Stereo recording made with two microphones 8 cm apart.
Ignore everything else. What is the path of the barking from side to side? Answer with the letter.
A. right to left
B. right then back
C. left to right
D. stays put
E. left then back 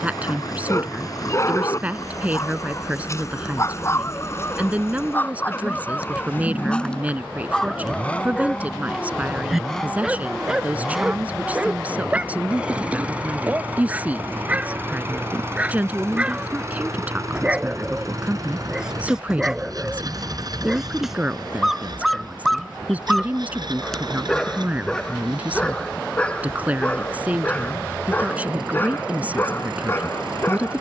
B.